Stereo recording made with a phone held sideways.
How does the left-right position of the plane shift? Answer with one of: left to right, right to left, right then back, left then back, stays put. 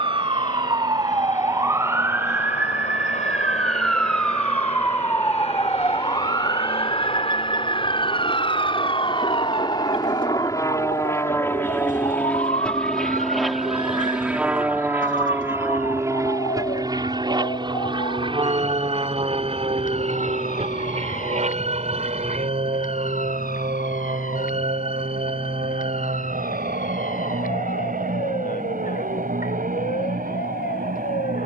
left to right.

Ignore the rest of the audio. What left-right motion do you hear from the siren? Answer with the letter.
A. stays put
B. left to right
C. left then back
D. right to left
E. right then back
D.